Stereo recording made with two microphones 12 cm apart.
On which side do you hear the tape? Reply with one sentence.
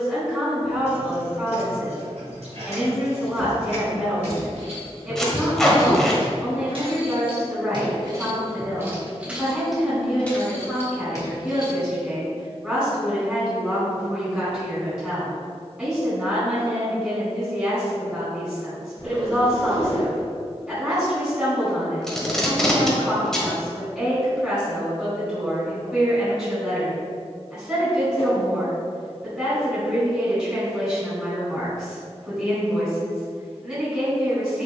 You can hear the tape in the centre.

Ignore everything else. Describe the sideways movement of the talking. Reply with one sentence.
You can hear the talking stay in one place.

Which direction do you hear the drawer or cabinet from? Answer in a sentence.
In this clip you hear the drawer or cabinet on the left.